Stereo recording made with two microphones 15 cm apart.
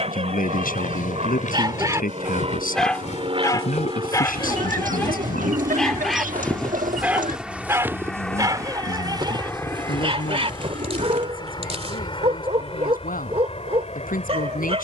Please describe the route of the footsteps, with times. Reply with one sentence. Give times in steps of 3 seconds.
In this clip you hear the footsteps on the left from 0 s, in the centre from 6 s, on the right from 9 s and not at all from 12 s.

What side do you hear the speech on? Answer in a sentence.
You can hear the speech on the left.